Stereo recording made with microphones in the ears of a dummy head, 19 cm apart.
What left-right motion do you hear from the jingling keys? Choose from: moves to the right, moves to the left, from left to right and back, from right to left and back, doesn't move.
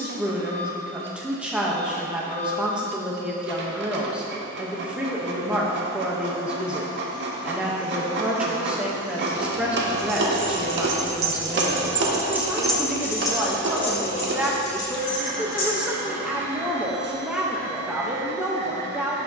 moves to the left.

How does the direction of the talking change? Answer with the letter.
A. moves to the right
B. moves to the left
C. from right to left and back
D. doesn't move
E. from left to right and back
D.